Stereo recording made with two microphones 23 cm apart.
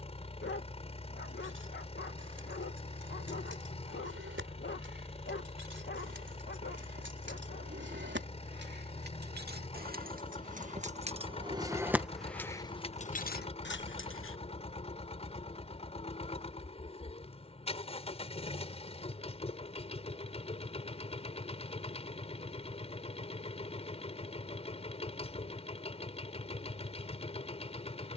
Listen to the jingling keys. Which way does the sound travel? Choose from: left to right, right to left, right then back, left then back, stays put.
right to left.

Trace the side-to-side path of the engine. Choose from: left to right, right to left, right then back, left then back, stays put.
stays put.